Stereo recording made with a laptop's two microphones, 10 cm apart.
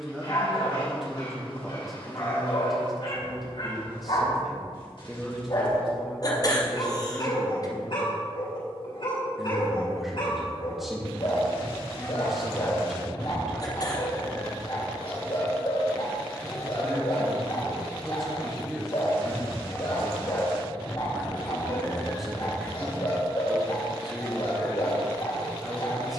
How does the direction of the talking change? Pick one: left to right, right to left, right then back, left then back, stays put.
stays put.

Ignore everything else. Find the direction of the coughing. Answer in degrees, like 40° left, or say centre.
40° left.